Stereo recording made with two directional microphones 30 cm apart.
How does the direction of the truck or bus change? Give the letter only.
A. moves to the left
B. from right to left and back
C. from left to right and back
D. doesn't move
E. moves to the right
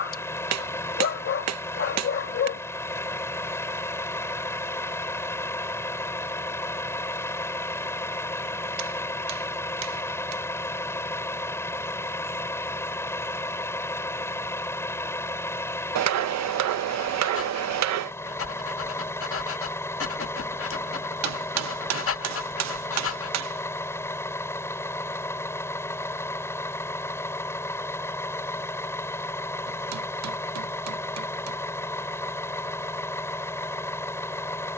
D.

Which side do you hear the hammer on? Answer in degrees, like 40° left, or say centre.
60° right.